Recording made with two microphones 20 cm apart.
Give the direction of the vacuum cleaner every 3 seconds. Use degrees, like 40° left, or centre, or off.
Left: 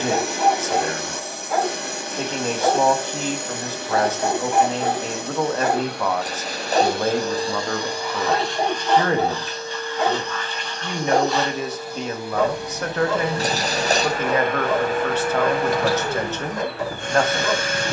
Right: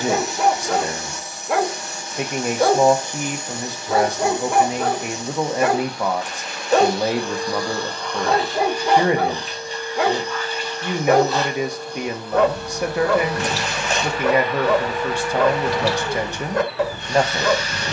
60° left, 60° left, 30° left, 10° right, 30° left, 50° left.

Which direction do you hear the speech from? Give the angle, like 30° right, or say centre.
10° right.